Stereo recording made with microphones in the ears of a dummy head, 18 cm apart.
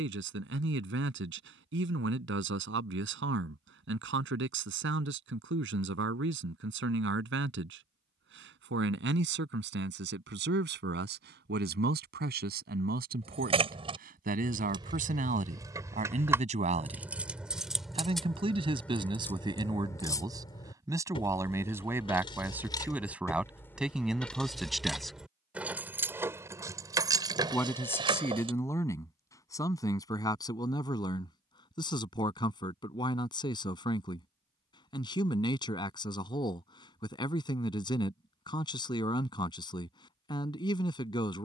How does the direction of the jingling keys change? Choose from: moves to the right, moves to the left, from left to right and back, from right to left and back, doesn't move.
from right to left and back.